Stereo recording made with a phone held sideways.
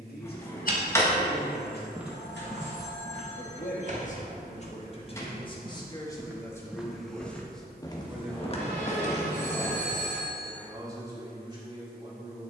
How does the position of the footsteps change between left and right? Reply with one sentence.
In this clip you hear the footsteps go right and come back.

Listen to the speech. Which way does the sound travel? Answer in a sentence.
You can hear the speech move from left to right.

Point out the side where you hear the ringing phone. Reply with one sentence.
In this clip you hear the ringing phone on the right.